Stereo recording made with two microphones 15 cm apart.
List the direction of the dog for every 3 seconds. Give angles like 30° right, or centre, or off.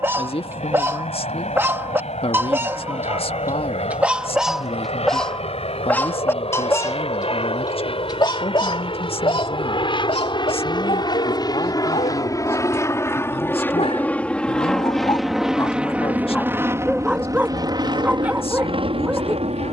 20° right, centre, 30° left, 40° left, 40° left, 10° left, 10° right.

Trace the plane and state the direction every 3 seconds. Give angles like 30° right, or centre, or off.
50° left, 50° left, 40° left, 30° left, 10° left, 10° right, 40° right.